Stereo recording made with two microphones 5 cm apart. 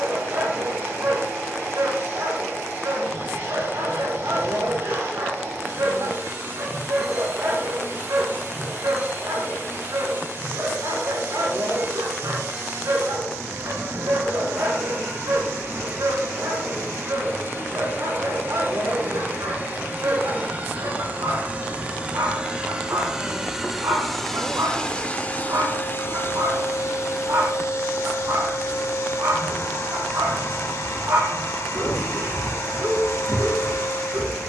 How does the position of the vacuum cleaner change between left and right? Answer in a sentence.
You can hear the vacuum cleaner move to the left.